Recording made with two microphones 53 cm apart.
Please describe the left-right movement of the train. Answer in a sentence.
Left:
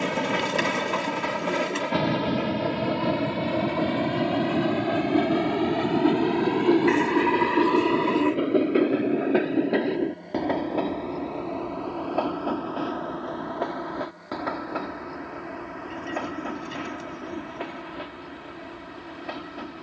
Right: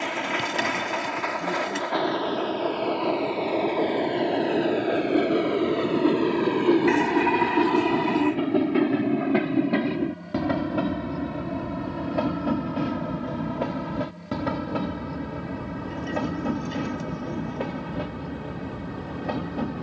You can hear the train move to the right.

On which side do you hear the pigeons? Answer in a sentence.
You can hear the pigeons in the centre.